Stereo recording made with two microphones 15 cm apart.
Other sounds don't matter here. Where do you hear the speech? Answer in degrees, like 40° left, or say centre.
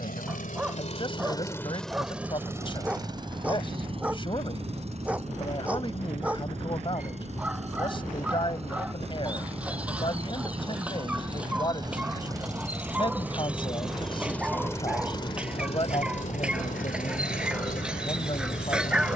30° left.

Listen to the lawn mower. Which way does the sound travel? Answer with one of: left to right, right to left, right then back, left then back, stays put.
right then back.